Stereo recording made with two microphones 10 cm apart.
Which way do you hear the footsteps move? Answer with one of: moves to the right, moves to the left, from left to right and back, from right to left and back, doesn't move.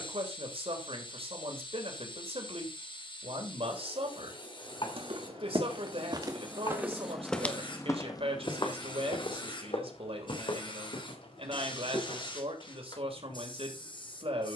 moves to the left.